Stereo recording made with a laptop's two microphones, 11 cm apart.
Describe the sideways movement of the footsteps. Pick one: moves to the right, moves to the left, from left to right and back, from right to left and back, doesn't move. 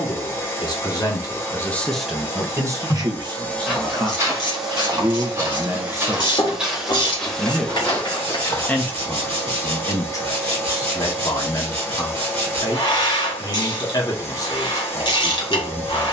from left to right and back.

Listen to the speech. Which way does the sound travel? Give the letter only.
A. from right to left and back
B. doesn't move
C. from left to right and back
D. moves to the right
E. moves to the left
C.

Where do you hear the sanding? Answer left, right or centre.
right.